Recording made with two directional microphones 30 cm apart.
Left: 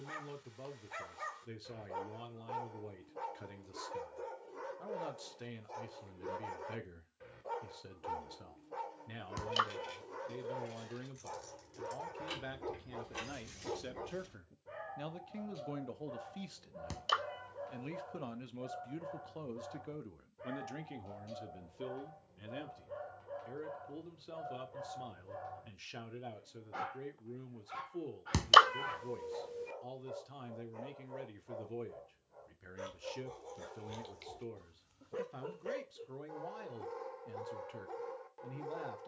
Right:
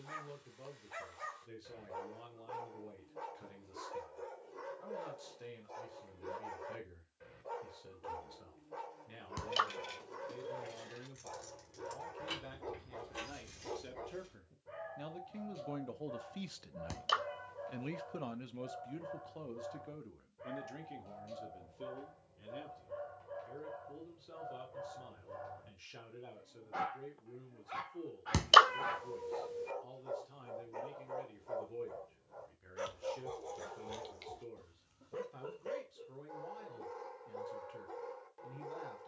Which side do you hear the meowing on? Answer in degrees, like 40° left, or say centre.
centre.